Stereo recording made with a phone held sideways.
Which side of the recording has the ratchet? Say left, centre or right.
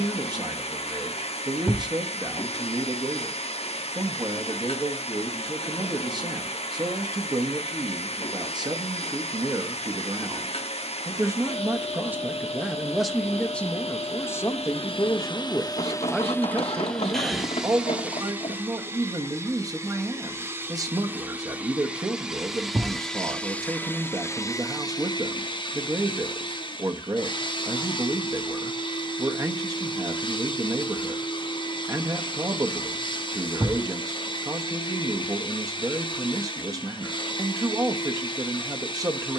left.